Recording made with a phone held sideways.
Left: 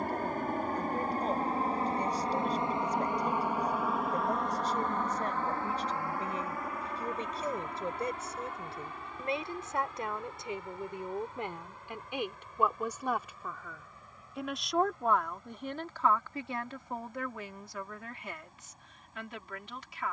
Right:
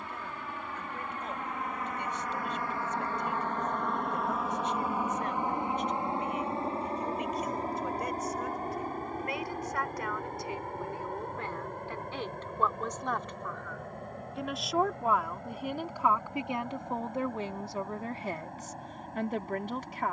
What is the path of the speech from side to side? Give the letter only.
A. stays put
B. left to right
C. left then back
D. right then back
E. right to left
B.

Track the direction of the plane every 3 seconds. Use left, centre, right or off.
left, centre, right, right, right, right, right.